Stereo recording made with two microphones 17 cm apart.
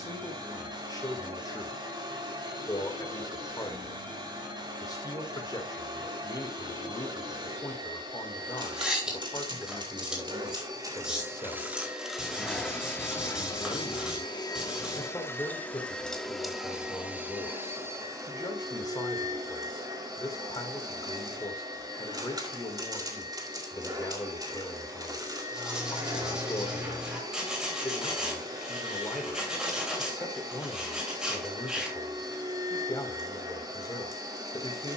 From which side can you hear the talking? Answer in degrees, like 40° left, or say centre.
20° left.